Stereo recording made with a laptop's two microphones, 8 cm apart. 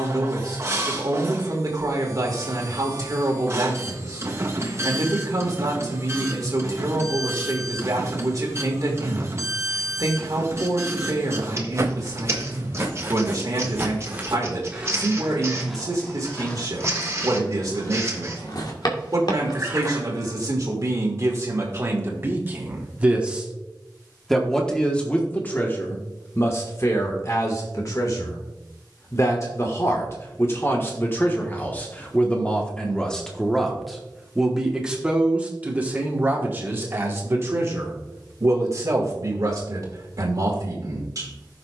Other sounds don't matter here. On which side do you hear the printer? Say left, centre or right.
right.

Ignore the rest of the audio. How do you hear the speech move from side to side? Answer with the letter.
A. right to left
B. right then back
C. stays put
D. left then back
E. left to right
D.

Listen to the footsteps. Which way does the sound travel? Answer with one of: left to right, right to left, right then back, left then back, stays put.
right to left.